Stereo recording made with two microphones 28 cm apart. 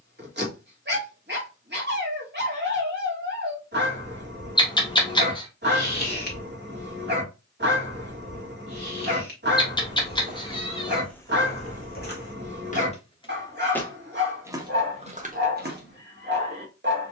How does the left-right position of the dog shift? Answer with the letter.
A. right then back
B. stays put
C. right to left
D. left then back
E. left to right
B.